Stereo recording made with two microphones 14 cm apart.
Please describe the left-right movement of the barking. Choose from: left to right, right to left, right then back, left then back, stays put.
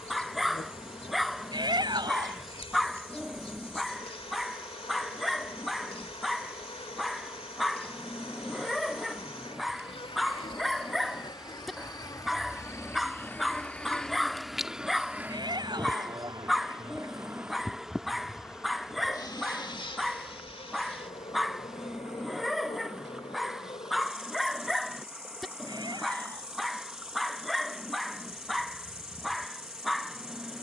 stays put.